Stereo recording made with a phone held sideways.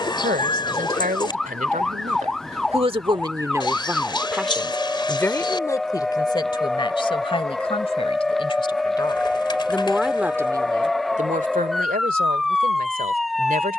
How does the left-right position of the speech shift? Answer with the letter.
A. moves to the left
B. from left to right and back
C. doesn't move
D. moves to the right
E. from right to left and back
E.